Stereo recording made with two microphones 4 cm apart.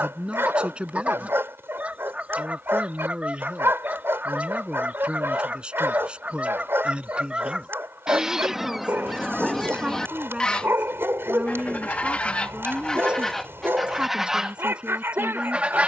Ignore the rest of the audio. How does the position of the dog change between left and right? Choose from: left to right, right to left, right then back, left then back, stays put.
stays put.